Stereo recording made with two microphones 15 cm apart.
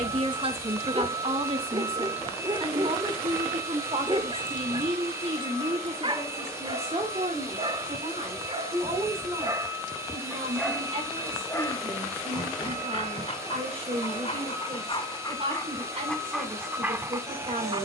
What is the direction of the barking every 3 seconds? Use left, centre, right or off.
right, right, right, centre, left, centre.